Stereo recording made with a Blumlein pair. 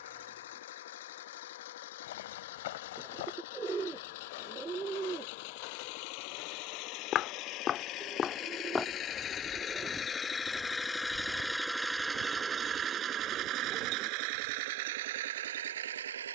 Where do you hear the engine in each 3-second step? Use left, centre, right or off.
left, left, left, centre, right, right.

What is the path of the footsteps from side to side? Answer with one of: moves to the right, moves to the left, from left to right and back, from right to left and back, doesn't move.
moves to the right.